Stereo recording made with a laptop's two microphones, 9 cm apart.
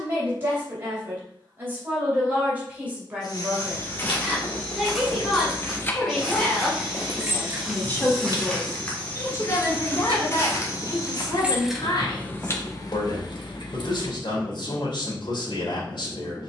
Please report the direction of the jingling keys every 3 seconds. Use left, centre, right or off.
off, left, right, right, left, off.